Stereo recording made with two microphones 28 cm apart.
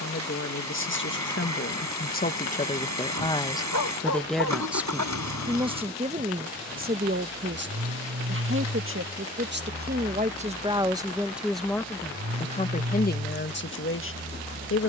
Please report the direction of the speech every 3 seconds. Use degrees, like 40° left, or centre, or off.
40° left, centre, 40° right, 20° right, 40° left.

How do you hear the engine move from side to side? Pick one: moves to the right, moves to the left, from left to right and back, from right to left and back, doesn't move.
doesn't move.